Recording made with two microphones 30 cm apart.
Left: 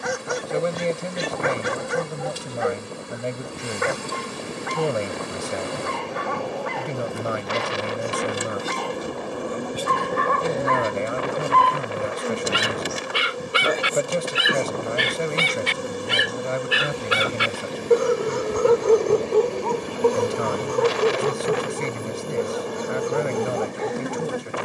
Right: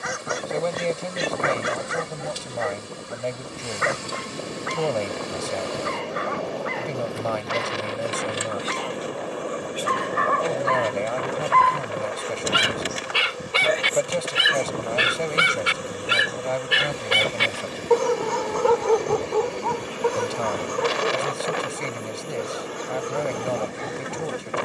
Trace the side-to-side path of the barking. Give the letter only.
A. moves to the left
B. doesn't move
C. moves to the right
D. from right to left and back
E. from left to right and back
E.